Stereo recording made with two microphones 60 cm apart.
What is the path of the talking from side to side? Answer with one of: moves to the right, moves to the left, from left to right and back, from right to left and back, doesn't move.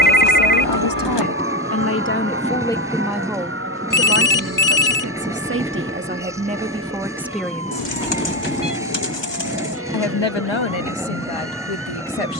from left to right and back.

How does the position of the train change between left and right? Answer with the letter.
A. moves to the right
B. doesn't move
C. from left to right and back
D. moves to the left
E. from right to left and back
B.